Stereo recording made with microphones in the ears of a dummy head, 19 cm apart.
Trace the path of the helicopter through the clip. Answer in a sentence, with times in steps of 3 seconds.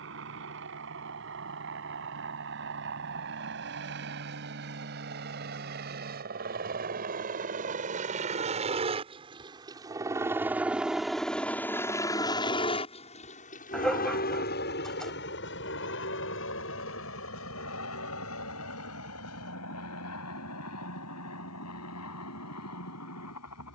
You can hear the helicopter on the right from 0 s, in the centre from 9 s and on the left from 12 s.